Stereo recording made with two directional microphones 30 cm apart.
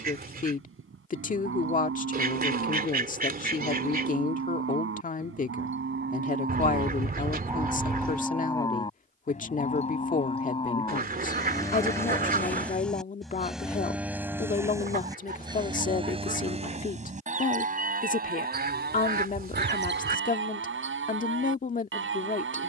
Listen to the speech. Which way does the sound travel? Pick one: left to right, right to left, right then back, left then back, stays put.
stays put.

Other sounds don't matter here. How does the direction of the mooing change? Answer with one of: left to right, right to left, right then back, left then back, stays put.
left then back.